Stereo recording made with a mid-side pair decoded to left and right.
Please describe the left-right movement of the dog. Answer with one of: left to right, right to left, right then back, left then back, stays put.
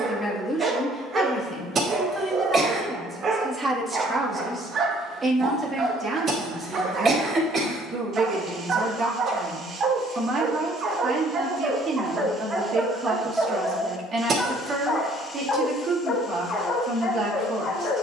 right to left.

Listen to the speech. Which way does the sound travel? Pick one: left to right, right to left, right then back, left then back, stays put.
left to right.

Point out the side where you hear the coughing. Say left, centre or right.
right.